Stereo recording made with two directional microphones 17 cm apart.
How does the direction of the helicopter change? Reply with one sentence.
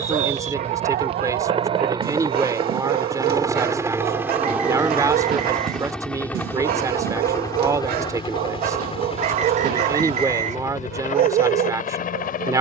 You can hear the helicopter move from right to left.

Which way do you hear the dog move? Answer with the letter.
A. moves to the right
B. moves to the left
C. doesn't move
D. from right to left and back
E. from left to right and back
C.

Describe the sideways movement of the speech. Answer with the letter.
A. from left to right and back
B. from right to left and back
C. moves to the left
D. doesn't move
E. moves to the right
D.